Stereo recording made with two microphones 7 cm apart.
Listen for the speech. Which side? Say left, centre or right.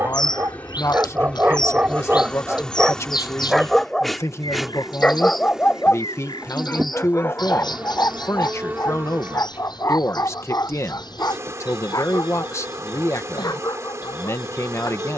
left.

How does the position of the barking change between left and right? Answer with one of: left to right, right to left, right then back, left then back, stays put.
right to left.